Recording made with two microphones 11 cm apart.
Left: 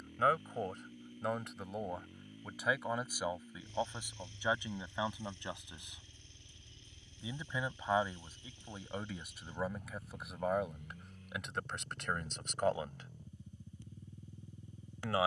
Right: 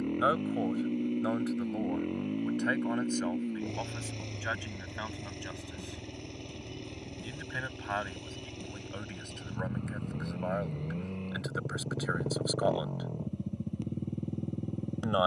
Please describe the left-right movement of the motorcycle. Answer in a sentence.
You can hear the motorcycle stay in one place.